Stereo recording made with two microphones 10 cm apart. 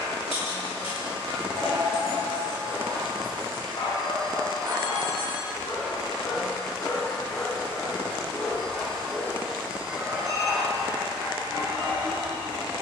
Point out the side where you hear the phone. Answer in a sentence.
You can hear the phone on the right.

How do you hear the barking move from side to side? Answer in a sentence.
In this clip you hear the barking move to the right.